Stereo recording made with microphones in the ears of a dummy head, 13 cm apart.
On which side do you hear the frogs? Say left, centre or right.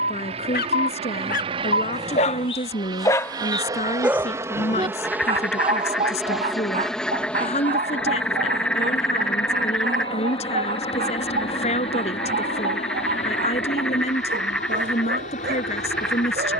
centre.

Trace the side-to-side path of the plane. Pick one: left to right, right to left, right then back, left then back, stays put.
right to left.